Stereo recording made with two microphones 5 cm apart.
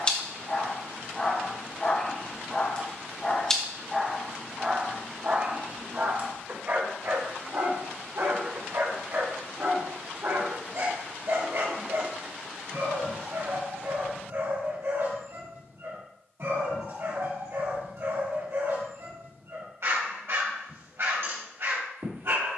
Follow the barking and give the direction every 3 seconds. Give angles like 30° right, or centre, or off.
20° left, 10° right, 50° right, 70° right, 70° right, 70° right, 70° right, 70° right.